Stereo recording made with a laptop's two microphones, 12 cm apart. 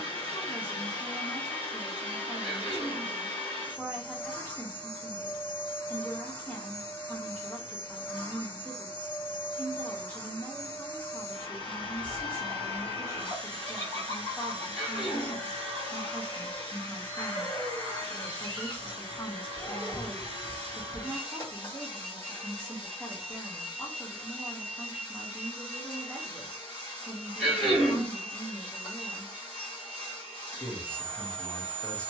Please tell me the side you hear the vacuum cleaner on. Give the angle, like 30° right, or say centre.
30° left.